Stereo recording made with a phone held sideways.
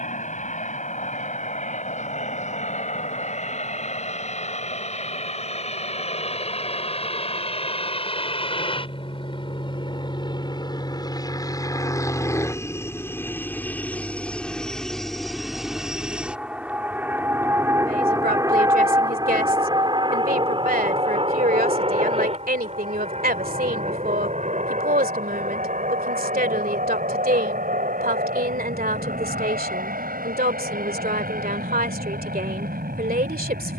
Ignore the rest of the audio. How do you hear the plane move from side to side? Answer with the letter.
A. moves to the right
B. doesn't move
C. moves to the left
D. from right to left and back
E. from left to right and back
A.